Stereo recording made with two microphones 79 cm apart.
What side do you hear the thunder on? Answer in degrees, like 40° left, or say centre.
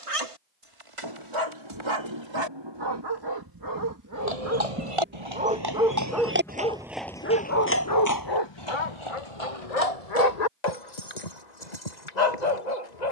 30° right.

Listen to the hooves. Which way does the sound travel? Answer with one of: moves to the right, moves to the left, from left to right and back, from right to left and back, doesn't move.
moves to the left.